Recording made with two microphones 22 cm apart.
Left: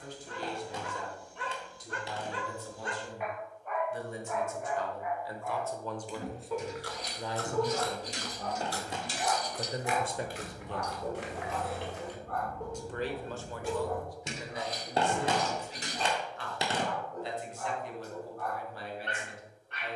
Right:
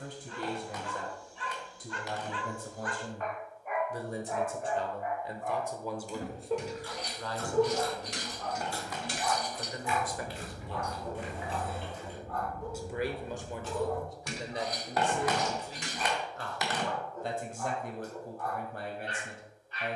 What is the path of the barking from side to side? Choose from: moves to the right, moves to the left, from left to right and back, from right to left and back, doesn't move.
from left to right and back.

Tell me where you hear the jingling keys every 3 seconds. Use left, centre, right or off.
off, off, right, right, centre, left, off.